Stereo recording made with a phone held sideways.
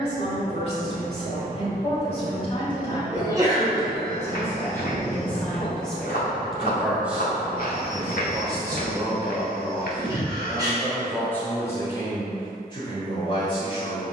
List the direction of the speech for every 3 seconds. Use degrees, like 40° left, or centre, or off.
40° left, 20° left, 10° right, centre, 30° left.